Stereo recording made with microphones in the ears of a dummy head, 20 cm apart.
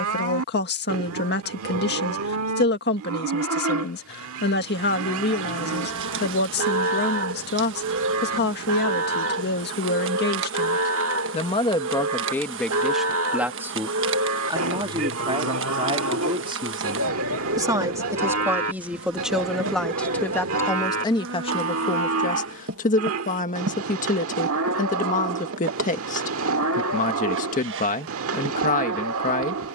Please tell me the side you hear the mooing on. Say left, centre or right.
right.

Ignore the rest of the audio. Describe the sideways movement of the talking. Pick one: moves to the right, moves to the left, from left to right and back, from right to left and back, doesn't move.
from left to right and back.